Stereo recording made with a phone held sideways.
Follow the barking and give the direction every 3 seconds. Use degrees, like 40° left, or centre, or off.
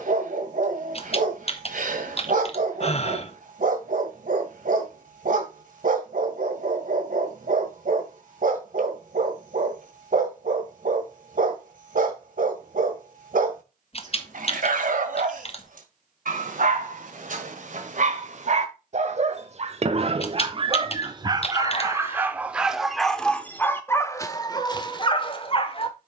70° right, 70° right, 70° right, 70° right, 70° right, 60° right, 50° right, 10° right, 30° left.